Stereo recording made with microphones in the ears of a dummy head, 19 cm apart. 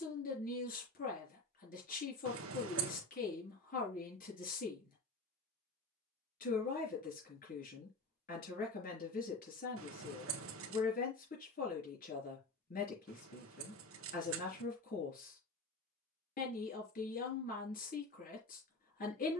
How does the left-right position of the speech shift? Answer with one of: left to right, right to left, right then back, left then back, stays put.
stays put.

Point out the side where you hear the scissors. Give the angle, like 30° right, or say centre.
70° right.